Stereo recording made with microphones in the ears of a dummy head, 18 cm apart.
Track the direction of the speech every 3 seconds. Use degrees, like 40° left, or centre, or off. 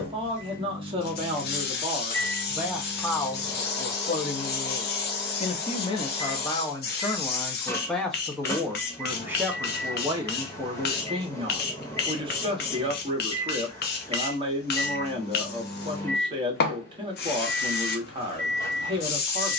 20° right, 30° left, 10° left, 20° right, 30° right, 30° right, 30° right.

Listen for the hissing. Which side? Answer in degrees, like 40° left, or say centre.
50° left.